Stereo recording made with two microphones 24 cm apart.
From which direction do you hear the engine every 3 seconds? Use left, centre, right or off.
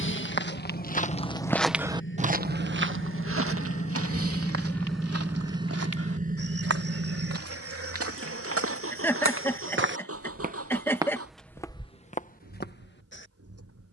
left, centre, right, right, right.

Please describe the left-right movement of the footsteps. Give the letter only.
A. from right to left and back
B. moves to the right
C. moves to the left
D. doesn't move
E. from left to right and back
E.